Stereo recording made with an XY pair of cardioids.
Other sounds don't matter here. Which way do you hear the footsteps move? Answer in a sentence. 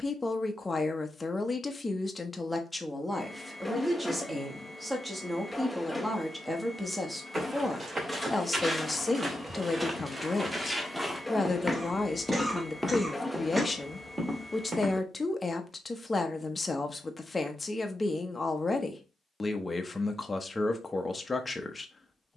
In this clip you hear the footsteps move from right to left and back again.